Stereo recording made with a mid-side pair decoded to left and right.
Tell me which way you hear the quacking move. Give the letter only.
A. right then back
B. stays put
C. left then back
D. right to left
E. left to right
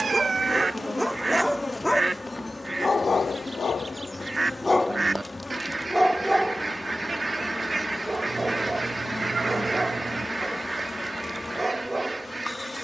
B.